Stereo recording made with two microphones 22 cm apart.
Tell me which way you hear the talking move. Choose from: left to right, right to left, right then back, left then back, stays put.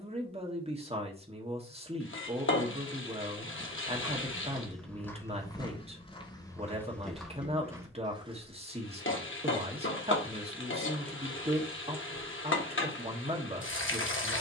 stays put.